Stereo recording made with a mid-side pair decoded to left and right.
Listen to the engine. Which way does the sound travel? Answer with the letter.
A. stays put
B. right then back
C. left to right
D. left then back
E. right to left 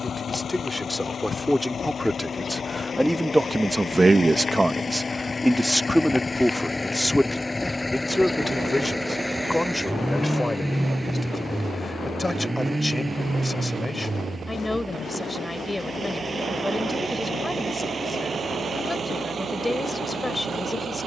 C.